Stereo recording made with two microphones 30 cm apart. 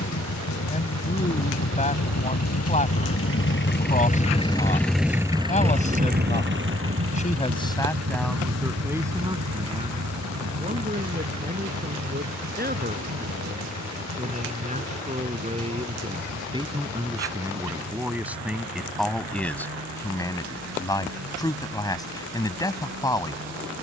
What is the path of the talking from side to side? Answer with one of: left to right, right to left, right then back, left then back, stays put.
right then back.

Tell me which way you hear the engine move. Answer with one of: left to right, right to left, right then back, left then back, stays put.
left to right.